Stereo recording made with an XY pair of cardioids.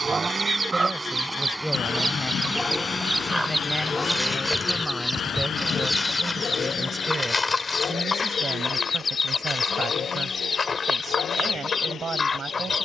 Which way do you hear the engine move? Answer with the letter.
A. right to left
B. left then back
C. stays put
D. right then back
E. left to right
A.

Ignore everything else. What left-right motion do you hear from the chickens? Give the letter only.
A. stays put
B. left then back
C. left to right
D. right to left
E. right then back
D.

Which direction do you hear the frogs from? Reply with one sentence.
In this clip you hear the frogs on the left.